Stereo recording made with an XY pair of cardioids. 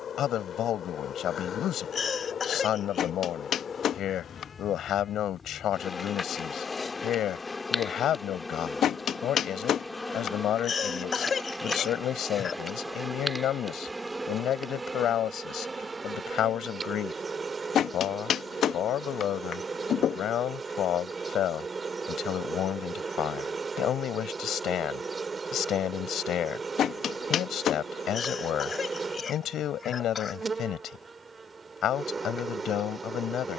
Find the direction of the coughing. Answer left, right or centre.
left.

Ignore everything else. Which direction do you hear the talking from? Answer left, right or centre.
left.